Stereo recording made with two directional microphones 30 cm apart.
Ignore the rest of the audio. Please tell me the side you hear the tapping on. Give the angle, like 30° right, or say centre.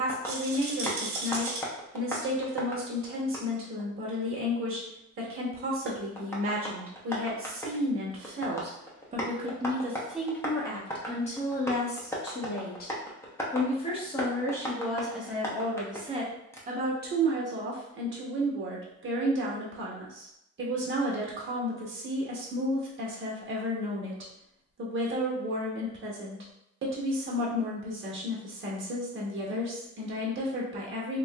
10° left.